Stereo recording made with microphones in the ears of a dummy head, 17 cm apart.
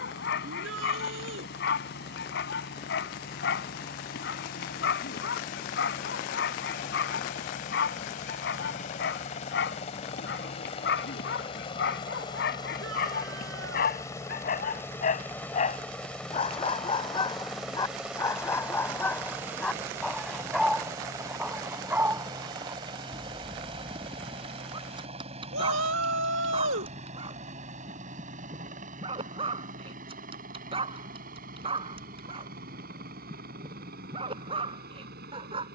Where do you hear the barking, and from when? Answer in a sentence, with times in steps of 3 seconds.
You can hear the barking on the left from 0 s, in the centre from 18 s and on the right from 24 s.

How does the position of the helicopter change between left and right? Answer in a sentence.
In this clip you hear the helicopter go from the left side to the right.